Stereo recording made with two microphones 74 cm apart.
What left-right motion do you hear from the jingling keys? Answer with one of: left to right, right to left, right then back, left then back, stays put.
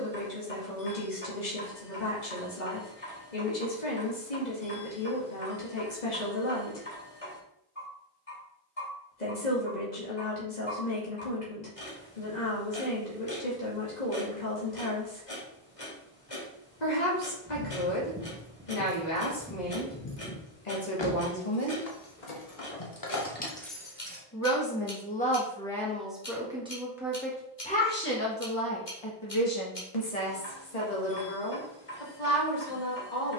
left then back.